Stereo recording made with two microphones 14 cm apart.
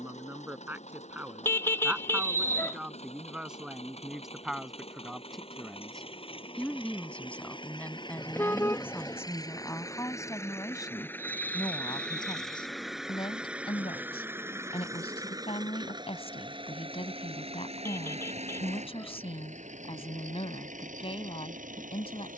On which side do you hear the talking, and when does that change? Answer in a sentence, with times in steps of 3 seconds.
You can hear the talking in the centre from 0 s and on the left from 9 s.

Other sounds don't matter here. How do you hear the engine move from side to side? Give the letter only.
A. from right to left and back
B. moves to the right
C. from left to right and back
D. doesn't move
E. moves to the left
B.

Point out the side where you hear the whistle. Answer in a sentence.
You can hear the whistle on the right.